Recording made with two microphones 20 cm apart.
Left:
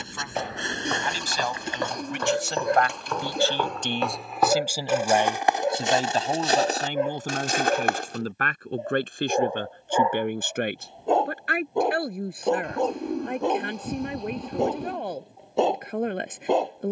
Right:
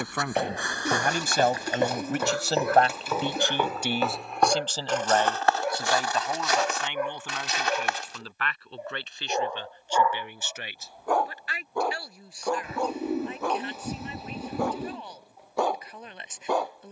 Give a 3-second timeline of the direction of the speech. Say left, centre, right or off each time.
right, centre, left, left, left, left.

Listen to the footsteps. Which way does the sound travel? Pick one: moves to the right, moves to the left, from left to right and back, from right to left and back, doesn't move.
moves to the left.